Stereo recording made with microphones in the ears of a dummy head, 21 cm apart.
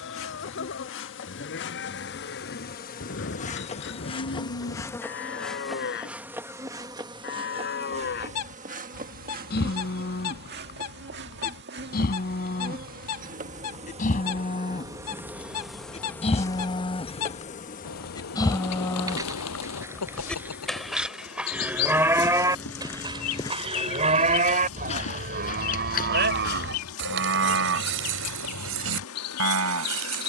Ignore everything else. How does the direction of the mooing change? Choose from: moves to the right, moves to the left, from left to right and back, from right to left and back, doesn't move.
moves to the right.